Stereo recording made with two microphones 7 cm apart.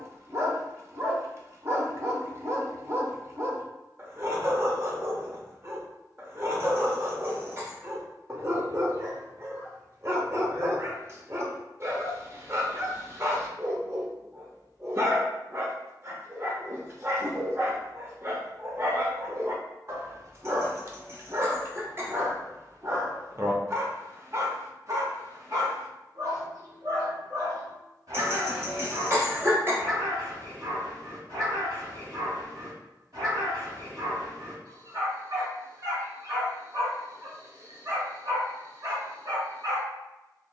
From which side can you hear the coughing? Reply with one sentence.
You can hear the coughing on the right.